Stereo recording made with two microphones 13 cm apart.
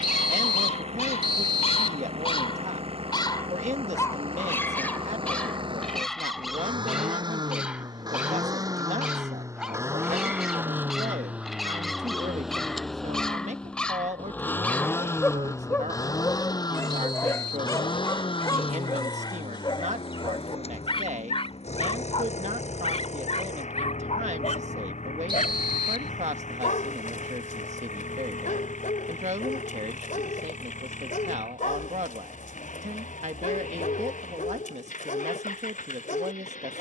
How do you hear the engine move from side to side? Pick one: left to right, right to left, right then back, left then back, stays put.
right to left.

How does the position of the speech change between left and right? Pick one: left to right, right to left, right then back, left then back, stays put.
stays put.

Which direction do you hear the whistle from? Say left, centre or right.
right.